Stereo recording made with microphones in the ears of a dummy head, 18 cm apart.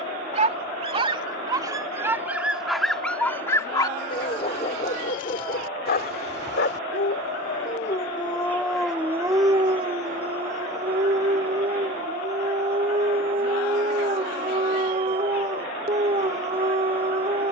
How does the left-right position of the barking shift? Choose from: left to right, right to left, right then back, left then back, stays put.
left then back.